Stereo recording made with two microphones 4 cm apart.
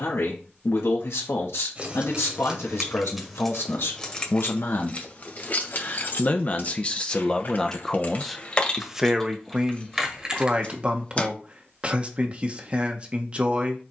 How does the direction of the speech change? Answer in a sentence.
You can hear the speech move to the right.